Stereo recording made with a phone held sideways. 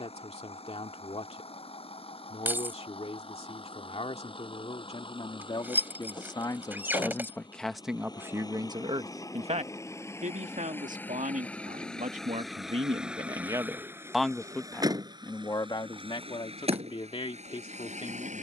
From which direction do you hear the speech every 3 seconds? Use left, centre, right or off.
left, left, centre, right, right, left.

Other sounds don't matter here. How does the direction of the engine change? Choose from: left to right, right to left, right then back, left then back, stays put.
left to right.